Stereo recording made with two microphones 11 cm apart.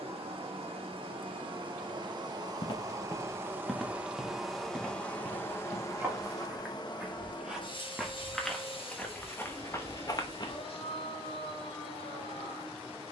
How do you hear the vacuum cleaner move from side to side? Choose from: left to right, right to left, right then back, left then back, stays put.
right to left.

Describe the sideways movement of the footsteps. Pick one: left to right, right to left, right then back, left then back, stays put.
right then back.